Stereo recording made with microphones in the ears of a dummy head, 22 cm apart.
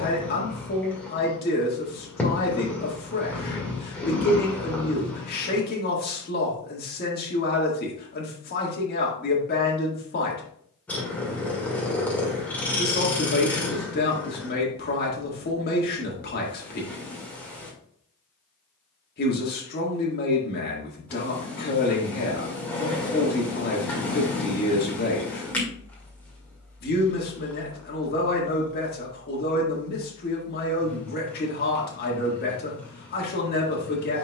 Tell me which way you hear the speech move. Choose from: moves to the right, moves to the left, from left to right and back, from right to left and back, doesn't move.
doesn't move.